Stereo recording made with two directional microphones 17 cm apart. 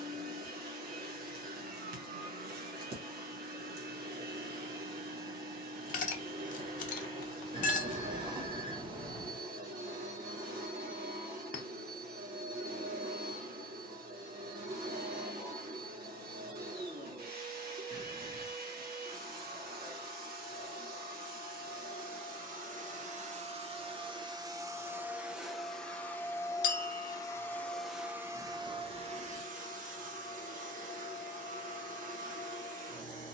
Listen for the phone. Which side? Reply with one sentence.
You can hear the phone on the right.